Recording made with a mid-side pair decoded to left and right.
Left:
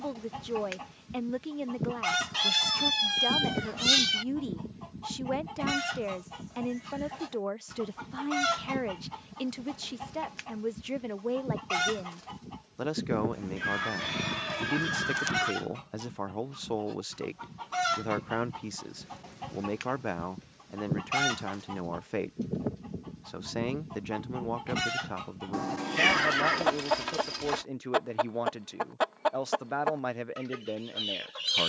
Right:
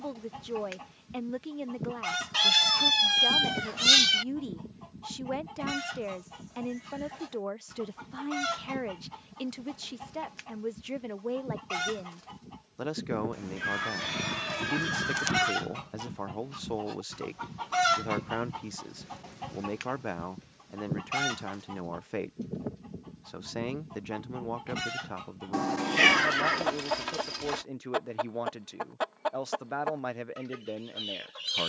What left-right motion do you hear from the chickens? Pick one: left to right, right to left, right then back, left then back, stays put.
right then back.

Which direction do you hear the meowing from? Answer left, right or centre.
right.